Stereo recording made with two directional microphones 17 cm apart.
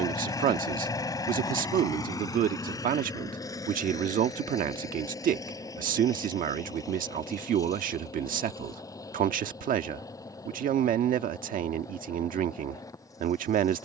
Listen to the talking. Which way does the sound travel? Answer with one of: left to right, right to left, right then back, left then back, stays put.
stays put.